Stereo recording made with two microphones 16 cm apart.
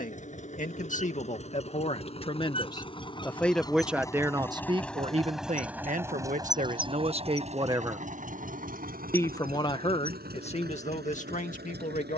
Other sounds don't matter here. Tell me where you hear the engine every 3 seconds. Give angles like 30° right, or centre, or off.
40° left, 10° left, 40° right, 70° right.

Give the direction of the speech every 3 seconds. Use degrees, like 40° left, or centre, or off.
40° left, 20° right, 40° right, 40° left.